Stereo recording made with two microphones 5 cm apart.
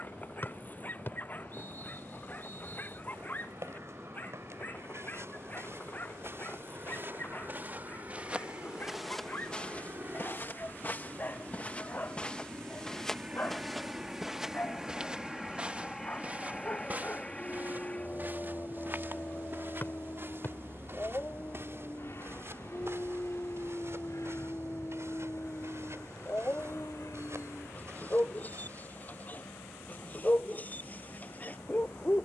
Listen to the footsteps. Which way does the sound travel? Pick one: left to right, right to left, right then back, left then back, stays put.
left then back.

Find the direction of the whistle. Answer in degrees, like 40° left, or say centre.
40° left.